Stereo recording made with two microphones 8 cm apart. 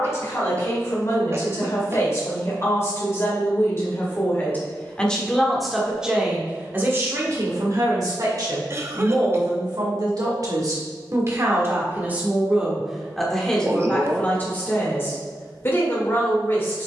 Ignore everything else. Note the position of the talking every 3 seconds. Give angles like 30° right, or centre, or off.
40° left, 20° left, 40° right, 50° right, 10° left, 30° left.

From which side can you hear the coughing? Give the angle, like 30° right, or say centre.
30° right.